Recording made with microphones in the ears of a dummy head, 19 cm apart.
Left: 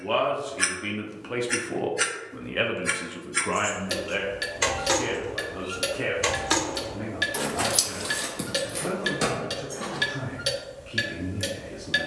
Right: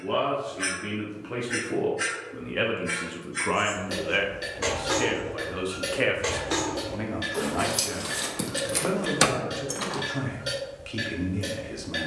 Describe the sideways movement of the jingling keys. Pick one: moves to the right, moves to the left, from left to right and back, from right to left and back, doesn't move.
moves to the right.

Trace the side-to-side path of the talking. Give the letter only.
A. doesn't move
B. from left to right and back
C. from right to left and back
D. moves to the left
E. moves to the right
E.